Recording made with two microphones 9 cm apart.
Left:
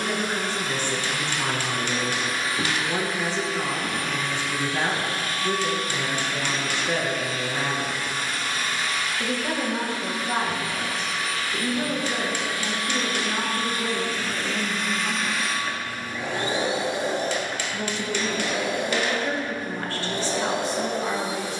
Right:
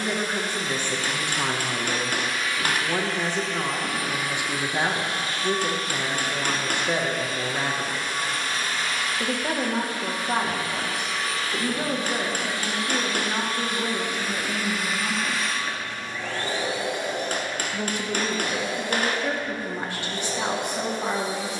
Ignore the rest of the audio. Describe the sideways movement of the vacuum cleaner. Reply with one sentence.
In this clip you hear the vacuum cleaner move from left to right and back again.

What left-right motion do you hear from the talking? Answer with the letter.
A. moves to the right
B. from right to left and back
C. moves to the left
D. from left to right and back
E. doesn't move
E.